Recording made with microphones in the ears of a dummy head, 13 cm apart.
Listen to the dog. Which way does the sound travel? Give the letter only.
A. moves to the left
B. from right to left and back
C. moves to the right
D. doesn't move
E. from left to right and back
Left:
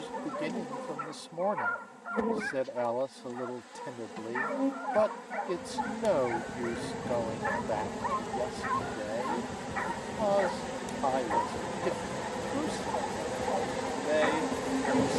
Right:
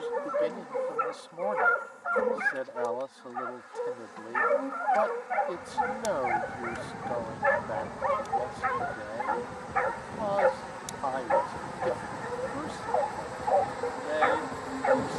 D.